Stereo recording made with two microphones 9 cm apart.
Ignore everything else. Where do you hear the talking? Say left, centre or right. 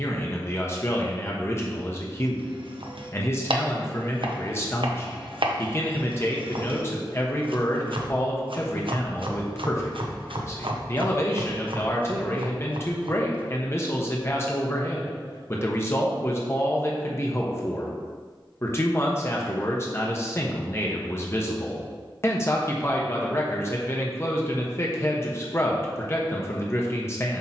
left.